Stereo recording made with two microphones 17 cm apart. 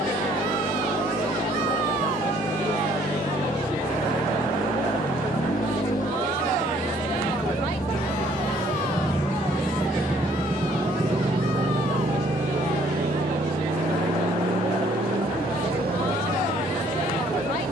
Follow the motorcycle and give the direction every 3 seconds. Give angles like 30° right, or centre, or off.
70° left, 70° left, 40° left, 20° right, 60° right, 70° right.